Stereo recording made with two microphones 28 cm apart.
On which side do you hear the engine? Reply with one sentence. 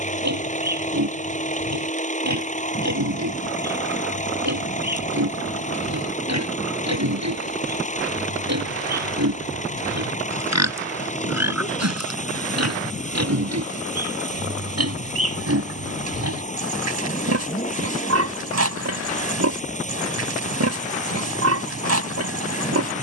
In this clip you hear the engine on the left.